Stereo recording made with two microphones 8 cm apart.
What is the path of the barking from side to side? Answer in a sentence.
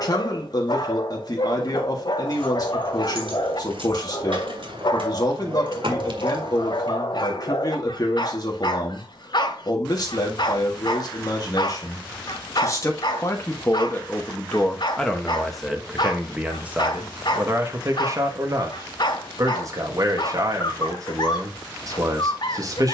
You can hear the barking stay put.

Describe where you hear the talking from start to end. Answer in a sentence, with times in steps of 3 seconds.
In this clip you hear the talking on the left from 0 s, in the centre from 15 s and on the right from 18 s.